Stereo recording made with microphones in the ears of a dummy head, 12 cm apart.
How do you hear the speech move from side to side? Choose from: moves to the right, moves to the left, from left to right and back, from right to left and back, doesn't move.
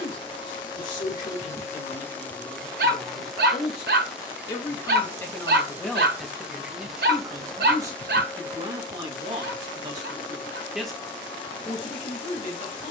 from left to right and back.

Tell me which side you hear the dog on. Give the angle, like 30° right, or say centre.
80° right.